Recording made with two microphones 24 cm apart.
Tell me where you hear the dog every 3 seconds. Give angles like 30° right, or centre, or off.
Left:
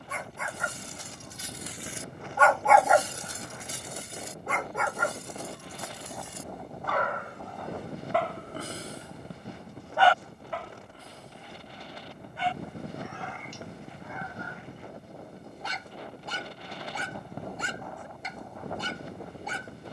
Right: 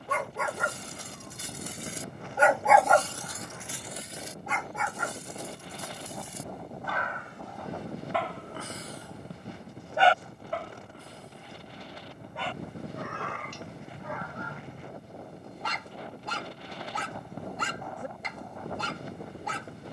50° right, 50° left, 50° left, 30° right, 70° right, 80° right, 80° right.